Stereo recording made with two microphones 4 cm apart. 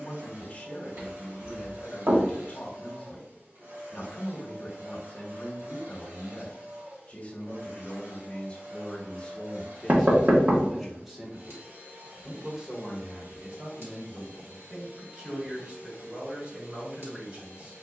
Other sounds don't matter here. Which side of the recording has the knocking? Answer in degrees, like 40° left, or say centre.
50° right.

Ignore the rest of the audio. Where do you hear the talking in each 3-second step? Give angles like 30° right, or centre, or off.
30° left, 30° left, 30° left, centre, 30° right, 30° right.